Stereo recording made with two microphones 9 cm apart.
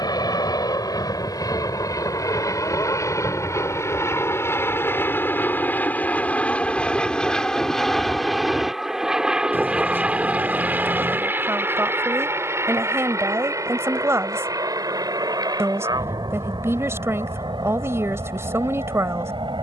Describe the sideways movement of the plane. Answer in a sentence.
In this clip you hear the plane move from left to right.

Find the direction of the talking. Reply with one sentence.
In this clip you hear the talking on the right.